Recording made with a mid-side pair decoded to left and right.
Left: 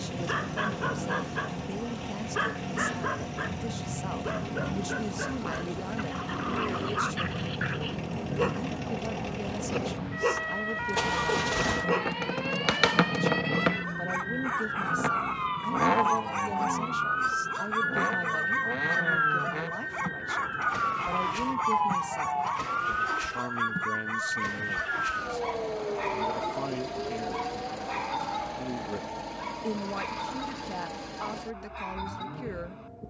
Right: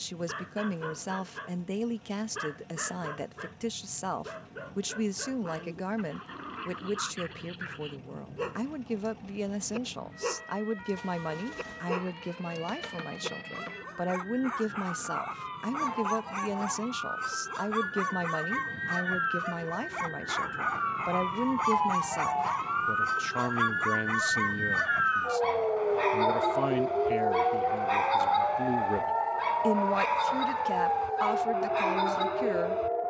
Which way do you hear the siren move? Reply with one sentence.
In this clip you hear the siren go from the left side to the right.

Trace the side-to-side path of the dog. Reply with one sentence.
In this clip you hear the dog move from left to right.